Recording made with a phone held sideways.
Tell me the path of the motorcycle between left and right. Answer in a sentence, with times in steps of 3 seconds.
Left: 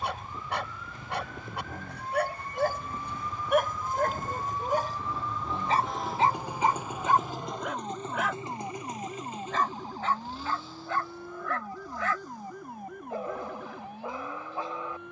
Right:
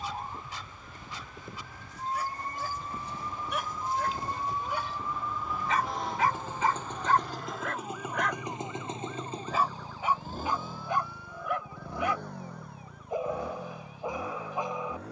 In this clip you hear the motorcycle on the left from 0 s, in the centre from 6 s and on the right from 9 s.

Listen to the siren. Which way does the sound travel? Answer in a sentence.
You can hear the siren go from the right side to the left.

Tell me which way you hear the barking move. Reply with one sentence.
You can hear the barking travel towards the right.